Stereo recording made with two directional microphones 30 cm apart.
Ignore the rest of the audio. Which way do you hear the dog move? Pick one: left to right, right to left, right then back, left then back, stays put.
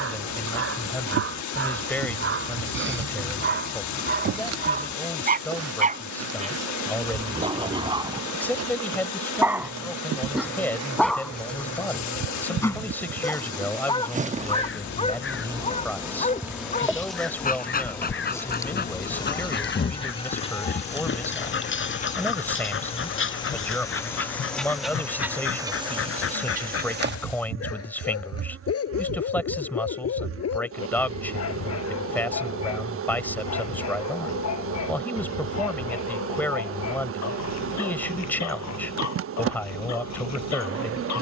right to left.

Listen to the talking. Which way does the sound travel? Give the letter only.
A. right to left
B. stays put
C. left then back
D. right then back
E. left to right
B.